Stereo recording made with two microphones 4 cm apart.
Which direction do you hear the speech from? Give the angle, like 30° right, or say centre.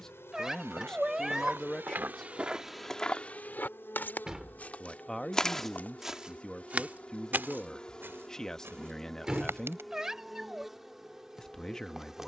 10° left.